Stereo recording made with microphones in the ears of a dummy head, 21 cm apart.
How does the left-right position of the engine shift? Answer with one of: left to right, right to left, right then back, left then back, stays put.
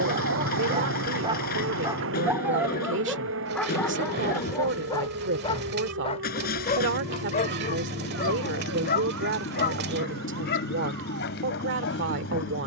stays put.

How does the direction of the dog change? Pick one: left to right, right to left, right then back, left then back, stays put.
right to left.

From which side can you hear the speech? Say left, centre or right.
right.